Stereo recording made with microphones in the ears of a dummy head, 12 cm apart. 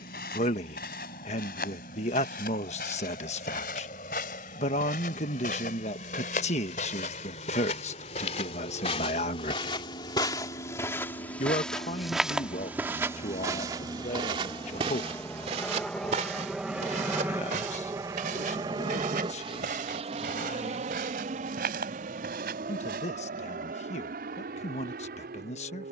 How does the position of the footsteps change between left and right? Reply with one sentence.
You can hear the footsteps move from left to right.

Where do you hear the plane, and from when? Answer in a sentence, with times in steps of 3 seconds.
You can hear the plane on the left from 0 s, in the centre from 15 s and on the right from 18 s.